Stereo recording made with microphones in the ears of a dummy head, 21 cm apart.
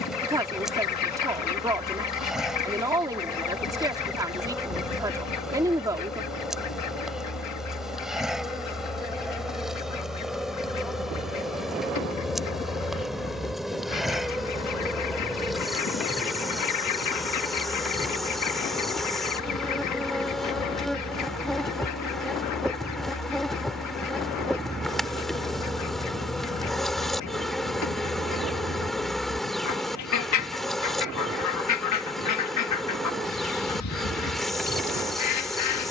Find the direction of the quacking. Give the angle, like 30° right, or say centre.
80° left.